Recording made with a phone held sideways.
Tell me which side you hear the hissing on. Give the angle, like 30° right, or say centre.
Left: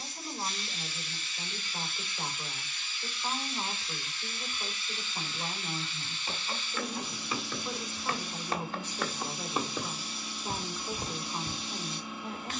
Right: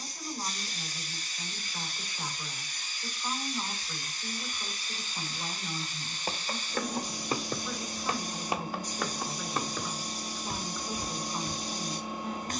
40° right.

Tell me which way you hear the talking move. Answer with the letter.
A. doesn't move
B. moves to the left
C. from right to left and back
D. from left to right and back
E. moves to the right
A.